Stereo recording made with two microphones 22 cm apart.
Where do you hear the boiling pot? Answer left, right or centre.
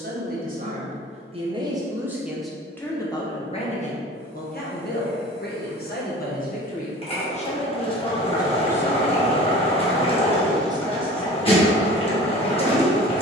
left.